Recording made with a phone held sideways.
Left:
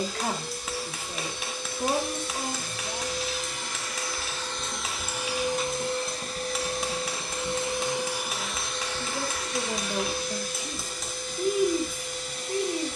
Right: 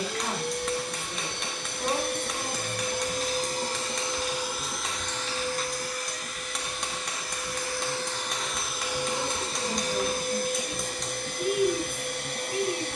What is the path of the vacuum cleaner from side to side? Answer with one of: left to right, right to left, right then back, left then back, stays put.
left then back.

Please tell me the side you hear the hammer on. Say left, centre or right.
centre.